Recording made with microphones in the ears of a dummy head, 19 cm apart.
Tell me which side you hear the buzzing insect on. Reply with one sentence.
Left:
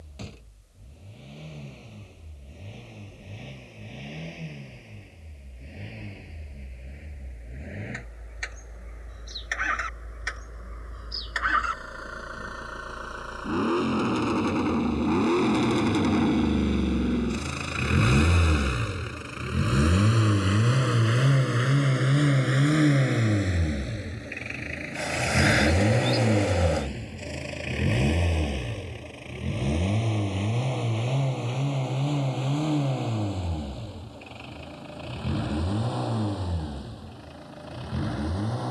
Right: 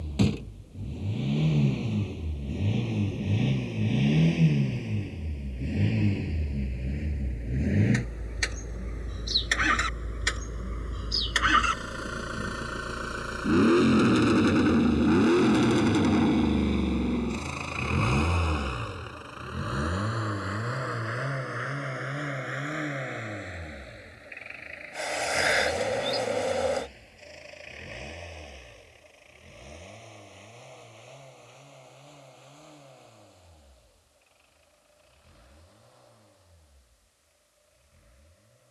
In this clip you hear the buzzing insect in the centre.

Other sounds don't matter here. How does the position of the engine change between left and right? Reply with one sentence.
You can hear the engine travel towards the left.